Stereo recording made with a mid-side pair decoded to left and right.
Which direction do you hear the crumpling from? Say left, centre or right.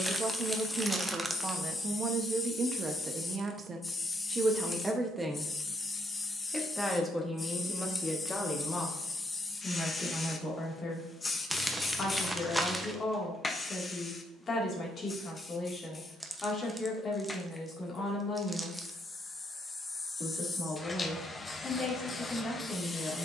centre.